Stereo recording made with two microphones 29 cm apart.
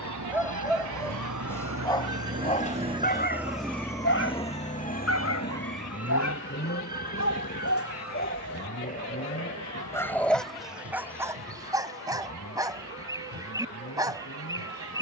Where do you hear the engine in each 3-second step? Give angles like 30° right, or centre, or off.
40° right, 20° left, 50° left, 60° left, 60° left.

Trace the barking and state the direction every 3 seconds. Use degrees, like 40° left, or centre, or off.
10° left, 50° left, 50° left, centre, 10° right.